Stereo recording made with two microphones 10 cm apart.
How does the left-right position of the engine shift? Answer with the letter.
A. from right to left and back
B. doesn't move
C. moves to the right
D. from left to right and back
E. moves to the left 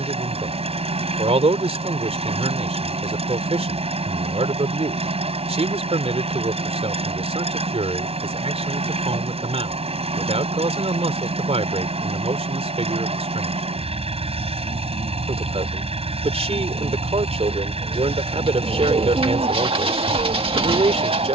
B.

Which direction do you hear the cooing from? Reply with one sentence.
You can hear the cooing on the right.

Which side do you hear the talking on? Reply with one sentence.
In this clip you hear the talking on the right.